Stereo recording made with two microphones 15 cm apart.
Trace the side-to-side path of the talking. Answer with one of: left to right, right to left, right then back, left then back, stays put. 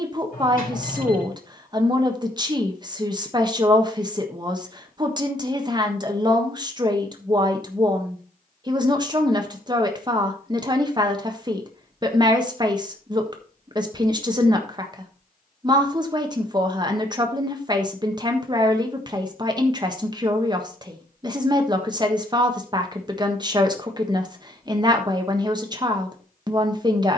stays put.